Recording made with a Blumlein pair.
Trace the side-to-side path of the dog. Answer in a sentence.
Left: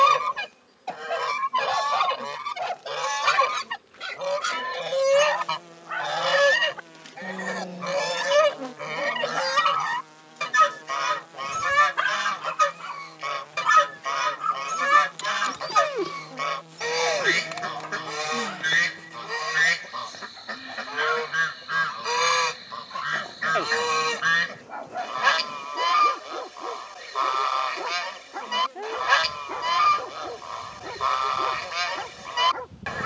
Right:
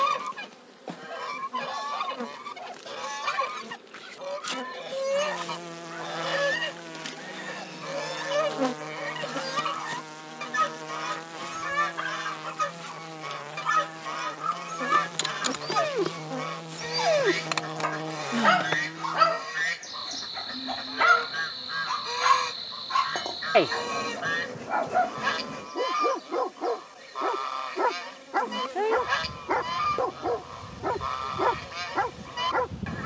In this clip you hear the dog move to the right.